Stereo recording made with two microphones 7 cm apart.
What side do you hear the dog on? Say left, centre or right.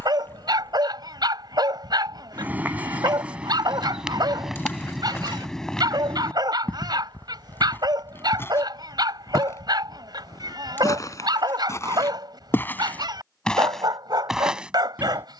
right.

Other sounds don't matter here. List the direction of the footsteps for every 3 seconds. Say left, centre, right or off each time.
right, centre, left, left, centre.